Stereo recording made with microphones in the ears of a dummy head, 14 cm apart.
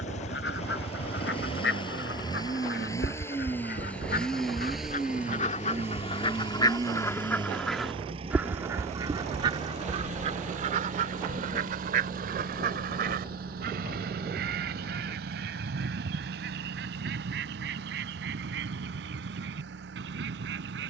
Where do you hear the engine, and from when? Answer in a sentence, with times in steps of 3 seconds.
In this clip you hear the engine on the left from 0 s, in the centre from 3 s and on the right from 6 s.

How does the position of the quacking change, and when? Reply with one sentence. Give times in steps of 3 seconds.
In this clip you hear the quacking on the left from 0 s, in the centre from 6 s and on the right from 9 s.